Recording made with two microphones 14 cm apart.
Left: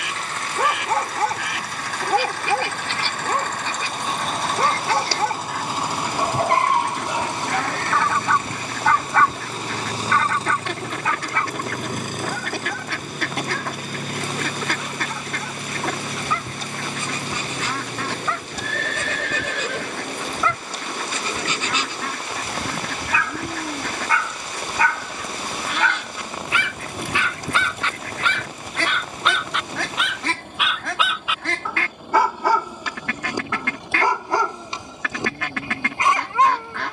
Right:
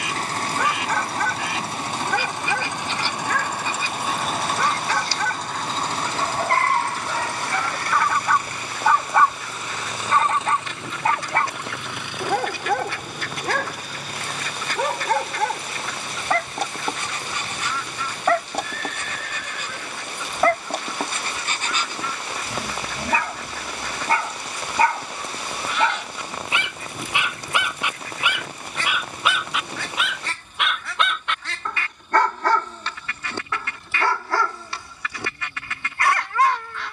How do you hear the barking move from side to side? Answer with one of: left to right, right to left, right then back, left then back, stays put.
right then back.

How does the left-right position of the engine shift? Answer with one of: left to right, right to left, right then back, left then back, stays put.
right to left.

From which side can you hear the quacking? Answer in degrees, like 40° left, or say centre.
60° left.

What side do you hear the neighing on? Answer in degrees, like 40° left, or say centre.
70° left.